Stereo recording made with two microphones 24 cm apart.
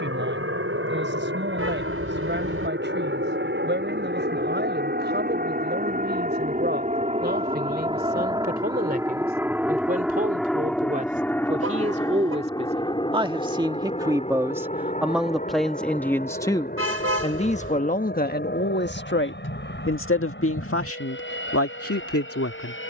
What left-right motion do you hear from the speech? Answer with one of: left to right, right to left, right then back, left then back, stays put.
right to left.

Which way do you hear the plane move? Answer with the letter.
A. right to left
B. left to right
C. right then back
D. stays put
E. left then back
A.